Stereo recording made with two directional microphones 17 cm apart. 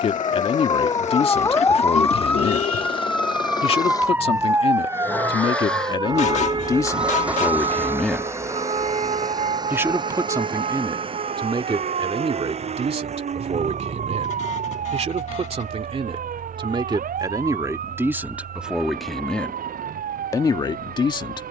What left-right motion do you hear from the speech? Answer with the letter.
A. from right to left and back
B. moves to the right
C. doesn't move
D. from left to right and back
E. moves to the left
D.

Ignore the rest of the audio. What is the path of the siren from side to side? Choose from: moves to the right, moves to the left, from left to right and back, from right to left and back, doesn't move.
moves to the right.